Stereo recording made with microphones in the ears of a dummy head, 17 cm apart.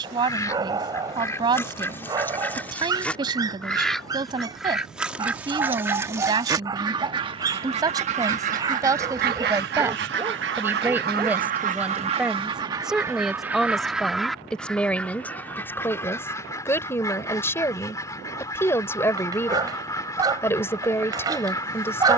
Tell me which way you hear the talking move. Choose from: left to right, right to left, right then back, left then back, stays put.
right to left.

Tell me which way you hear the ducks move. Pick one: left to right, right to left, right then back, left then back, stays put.
right then back.